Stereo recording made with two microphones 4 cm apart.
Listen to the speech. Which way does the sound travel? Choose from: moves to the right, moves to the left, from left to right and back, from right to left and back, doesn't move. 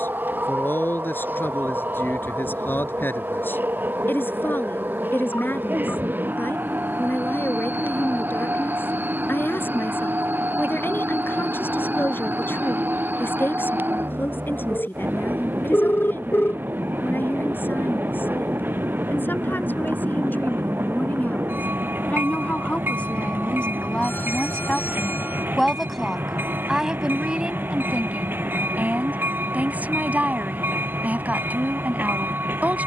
moves to the right.